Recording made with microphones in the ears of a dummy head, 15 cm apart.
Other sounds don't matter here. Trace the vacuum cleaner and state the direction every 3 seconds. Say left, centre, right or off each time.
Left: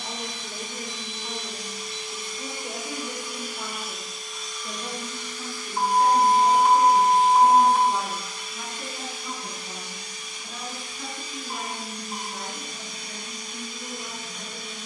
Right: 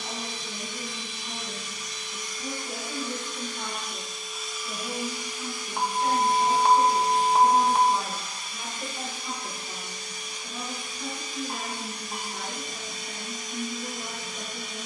left, centre, right, right, right.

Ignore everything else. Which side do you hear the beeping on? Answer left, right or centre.
right.